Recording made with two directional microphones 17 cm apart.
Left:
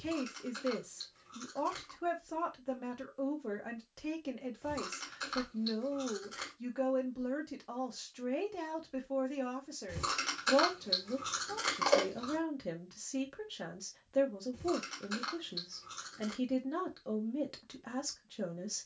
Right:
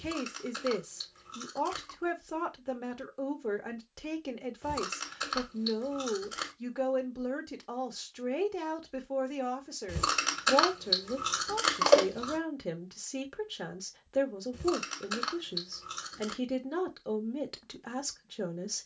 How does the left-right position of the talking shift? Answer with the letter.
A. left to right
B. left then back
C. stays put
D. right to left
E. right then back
C.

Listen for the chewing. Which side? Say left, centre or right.
right.